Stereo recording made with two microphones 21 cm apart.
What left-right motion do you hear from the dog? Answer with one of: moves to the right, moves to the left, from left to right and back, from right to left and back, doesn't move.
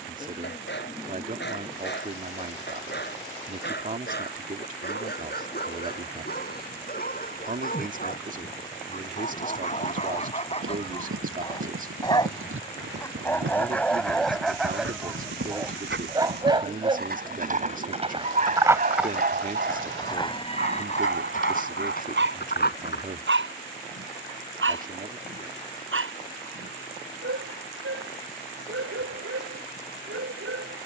moves to the right.